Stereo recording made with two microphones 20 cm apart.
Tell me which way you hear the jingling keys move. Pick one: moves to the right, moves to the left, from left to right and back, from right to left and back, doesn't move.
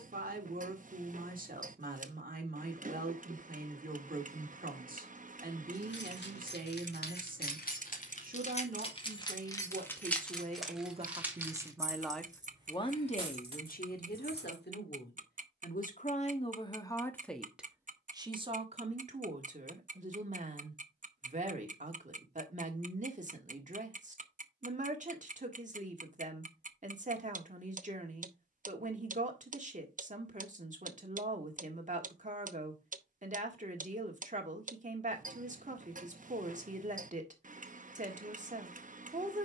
moves to the right.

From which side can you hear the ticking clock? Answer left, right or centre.
right.